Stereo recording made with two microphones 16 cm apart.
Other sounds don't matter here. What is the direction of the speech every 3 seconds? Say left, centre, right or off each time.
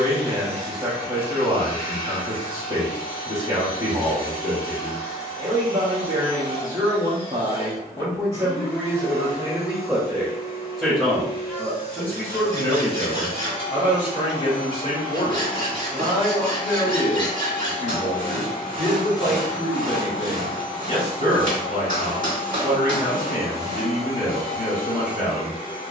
right, right, right, centre, left, left, left, left, left.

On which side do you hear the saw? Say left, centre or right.
right.